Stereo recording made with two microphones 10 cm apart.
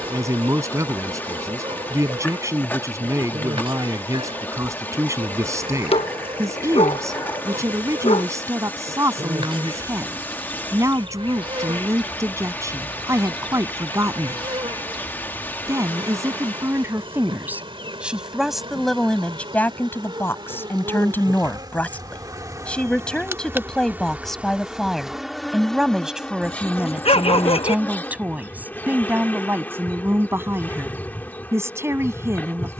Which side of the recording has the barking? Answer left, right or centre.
left.